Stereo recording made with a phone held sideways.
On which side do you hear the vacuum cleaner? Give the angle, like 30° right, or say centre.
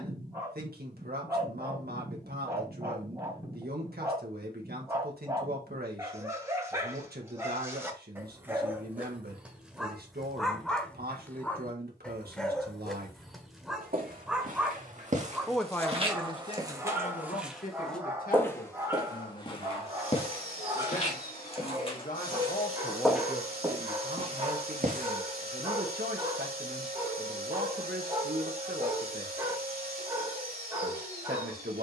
70° right.